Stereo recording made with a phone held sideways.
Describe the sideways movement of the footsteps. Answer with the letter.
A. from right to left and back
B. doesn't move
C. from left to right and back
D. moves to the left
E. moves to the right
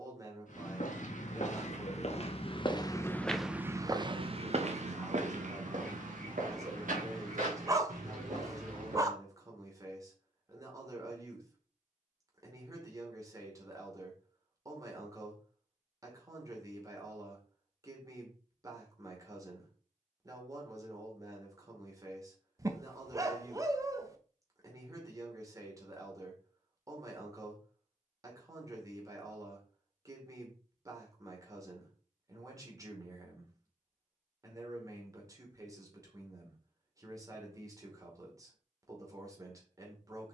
E.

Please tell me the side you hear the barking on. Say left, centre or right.
right.